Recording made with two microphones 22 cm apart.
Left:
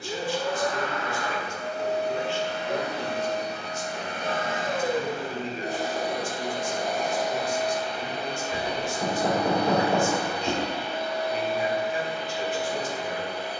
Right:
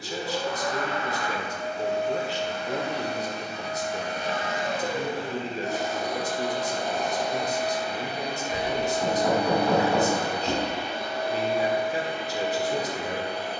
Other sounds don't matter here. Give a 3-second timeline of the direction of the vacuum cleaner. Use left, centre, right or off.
left, left, centre, right, right.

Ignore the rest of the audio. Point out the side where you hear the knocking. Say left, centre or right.
left.